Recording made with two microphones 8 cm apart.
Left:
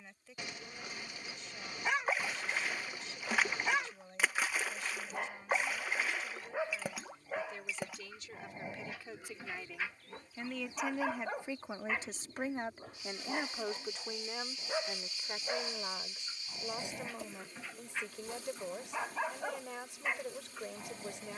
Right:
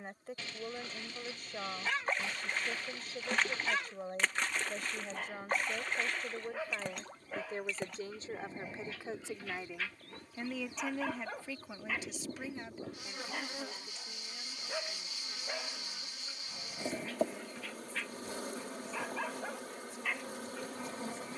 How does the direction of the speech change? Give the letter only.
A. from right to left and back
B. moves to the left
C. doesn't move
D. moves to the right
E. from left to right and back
B.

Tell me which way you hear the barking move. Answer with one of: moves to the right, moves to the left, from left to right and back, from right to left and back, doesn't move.
doesn't move.